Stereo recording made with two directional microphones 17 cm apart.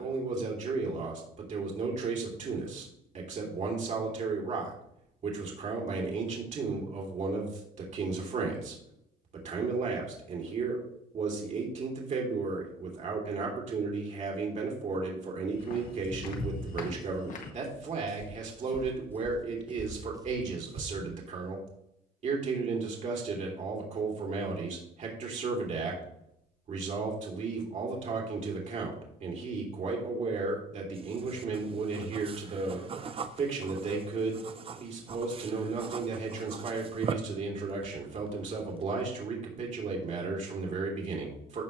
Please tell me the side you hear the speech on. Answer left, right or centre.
right.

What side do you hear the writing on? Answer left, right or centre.
right.